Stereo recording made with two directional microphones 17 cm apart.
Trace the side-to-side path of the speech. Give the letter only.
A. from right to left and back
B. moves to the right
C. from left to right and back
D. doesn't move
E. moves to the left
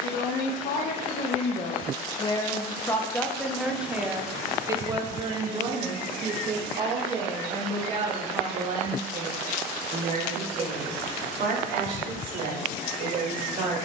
B.